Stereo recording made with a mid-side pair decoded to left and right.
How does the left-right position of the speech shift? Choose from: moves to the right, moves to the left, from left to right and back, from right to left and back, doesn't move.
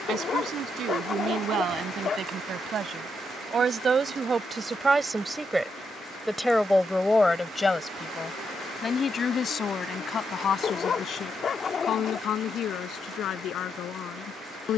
moves to the left.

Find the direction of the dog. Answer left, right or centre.
left.